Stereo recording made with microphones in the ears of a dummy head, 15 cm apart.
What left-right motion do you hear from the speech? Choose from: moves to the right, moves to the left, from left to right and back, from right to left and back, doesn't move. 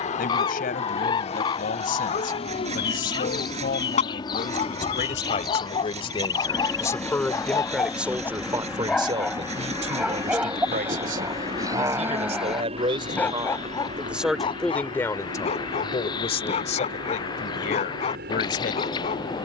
from left to right and back.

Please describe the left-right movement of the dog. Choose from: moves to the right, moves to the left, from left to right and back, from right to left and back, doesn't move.
from left to right and back.